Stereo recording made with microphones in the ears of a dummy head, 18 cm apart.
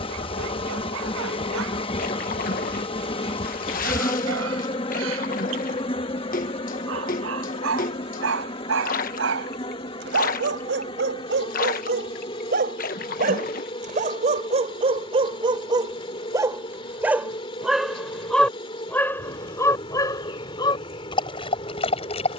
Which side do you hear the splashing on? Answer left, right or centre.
left.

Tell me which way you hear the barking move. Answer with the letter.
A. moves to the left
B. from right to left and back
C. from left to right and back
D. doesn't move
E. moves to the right
A.